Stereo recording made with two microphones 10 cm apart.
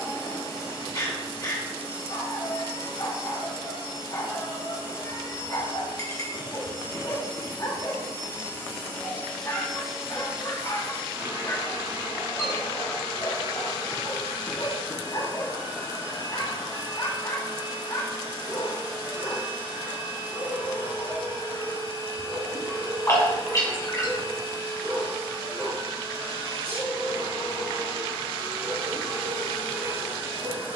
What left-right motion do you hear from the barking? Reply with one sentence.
In this clip you hear the barking move to the right.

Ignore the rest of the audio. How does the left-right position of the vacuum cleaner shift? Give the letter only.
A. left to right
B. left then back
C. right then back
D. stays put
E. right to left
A.